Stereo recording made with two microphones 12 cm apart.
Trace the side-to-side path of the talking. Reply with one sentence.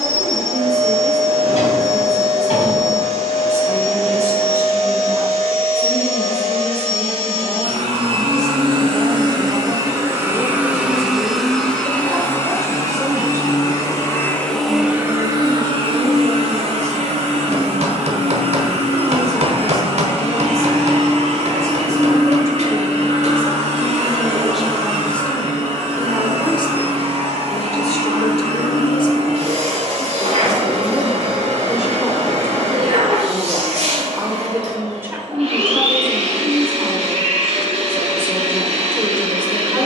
In this clip you hear the talking move from right to left and back again.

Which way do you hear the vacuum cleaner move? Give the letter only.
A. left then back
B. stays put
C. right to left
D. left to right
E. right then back
A.